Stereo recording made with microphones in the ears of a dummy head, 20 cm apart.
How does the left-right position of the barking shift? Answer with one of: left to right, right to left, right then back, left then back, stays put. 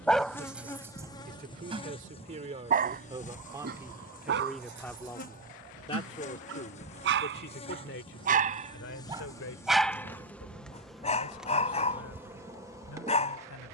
right then back.